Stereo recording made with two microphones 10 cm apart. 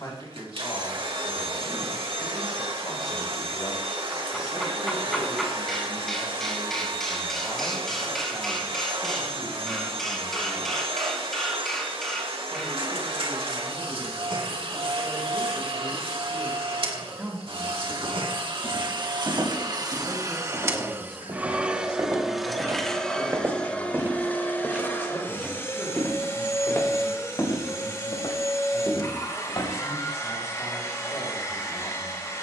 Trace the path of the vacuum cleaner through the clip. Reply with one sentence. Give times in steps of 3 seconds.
You can hear the vacuum cleaner on the right from 0 s, in the centre from 21 s and on the left from 24 s.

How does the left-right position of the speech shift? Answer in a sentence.
In this clip you hear the speech go right and come back.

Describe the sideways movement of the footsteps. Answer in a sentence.
You can hear the footsteps move from right to left.